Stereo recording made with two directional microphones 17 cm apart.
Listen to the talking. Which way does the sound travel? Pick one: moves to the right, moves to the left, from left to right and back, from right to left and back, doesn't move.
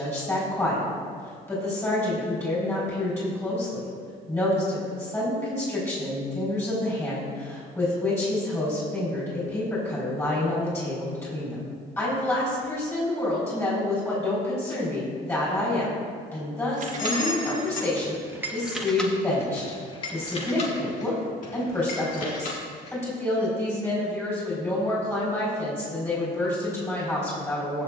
doesn't move.